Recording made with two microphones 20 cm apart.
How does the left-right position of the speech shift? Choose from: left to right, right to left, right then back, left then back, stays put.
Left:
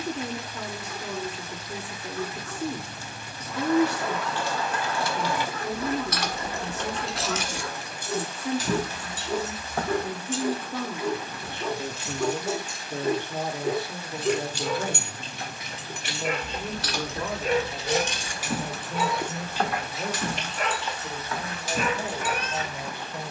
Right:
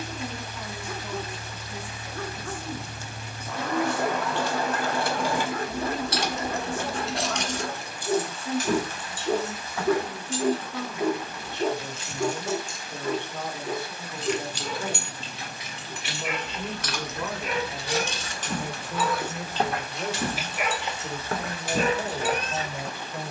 left to right.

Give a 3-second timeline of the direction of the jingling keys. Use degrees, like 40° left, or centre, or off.
off, 60° right, 10° left, 50° left, 60° left, 30° left, 10° right, 50° right.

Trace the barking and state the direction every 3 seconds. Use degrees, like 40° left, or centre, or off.
50° right, 50° right, 50° right, 40° right, 30° left, 40° left, 10° left, 30° right.